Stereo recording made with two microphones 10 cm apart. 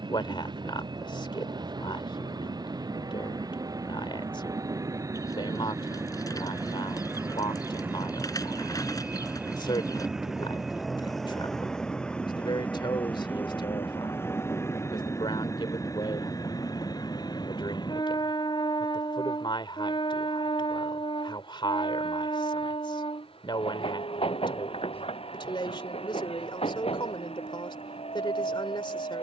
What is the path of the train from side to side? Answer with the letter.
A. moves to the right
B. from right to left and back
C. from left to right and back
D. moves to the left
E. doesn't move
D.